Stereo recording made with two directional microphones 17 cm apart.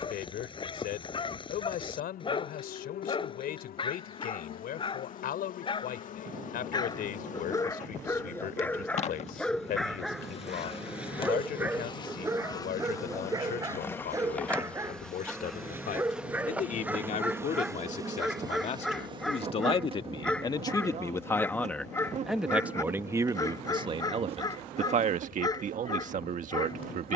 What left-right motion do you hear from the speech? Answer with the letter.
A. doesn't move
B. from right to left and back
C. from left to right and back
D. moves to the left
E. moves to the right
E.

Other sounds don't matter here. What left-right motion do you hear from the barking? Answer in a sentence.
You can hear the barking go right and come back.